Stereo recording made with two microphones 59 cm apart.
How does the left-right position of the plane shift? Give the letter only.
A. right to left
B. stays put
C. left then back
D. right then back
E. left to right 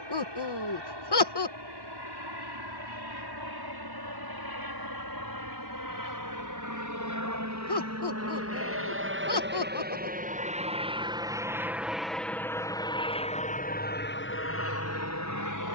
A.